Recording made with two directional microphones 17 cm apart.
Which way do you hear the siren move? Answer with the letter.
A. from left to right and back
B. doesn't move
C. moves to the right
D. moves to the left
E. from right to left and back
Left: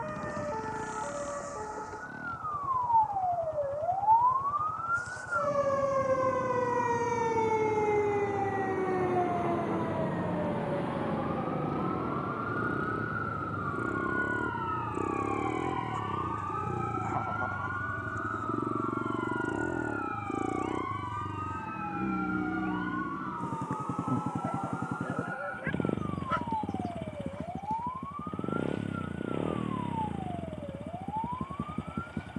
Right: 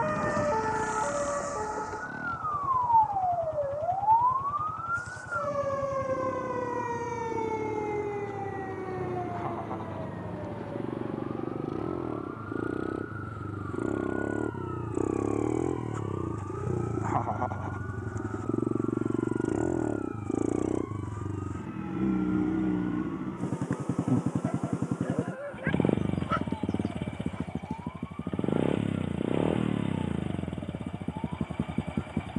D.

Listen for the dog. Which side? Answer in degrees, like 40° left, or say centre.
10° right.